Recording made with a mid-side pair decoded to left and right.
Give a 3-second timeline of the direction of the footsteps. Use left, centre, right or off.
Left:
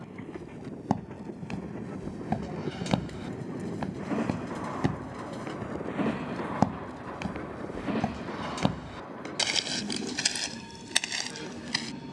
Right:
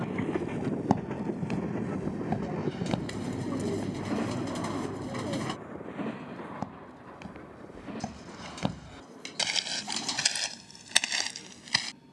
centre, left, left, centre.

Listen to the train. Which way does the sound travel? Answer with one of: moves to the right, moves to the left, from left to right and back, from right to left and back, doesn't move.
moves to the left.